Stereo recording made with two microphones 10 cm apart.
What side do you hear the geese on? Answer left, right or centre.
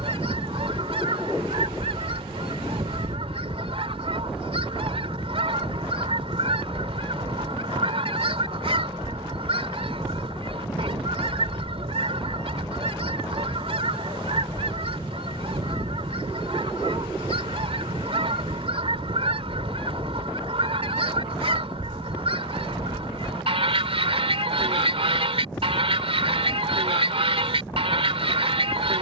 right.